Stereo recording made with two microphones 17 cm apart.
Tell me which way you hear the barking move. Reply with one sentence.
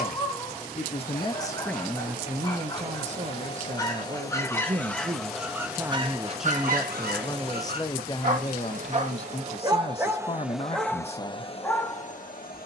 You can hear the barking move from left to right and back again.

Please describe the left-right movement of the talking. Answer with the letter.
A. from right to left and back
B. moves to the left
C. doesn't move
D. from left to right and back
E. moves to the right
D.